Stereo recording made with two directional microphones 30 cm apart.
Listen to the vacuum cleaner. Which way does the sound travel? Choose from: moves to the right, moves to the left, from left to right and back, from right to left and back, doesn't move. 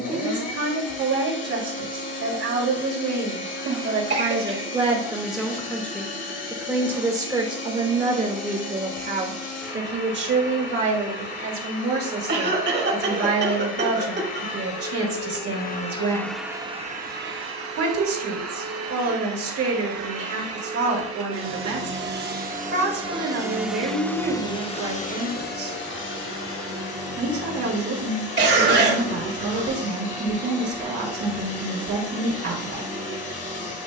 from left to right and back.